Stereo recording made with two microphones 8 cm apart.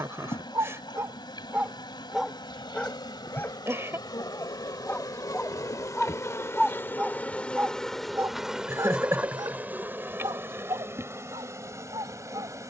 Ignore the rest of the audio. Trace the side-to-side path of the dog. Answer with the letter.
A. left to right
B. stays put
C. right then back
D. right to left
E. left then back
E.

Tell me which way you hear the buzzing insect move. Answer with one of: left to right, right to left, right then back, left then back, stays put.
left to right.